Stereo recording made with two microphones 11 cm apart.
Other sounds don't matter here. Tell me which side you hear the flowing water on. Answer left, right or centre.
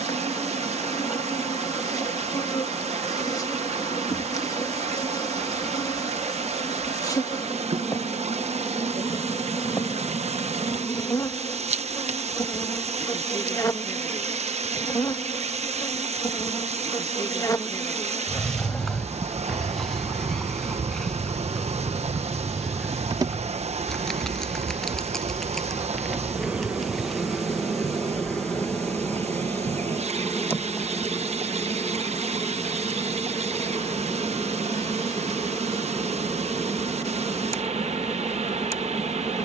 right.